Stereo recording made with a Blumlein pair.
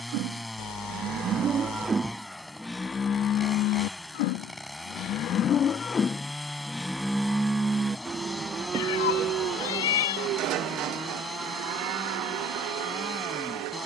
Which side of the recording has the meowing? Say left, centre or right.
left.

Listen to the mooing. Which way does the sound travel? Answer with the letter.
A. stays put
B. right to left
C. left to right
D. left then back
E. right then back
D.